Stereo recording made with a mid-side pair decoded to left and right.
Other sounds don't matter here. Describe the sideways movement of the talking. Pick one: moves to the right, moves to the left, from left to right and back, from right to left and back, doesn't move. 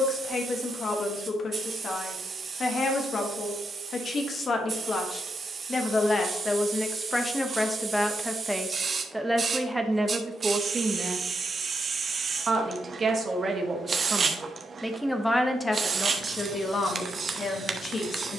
from left to right and back.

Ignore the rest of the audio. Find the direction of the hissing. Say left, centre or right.
right.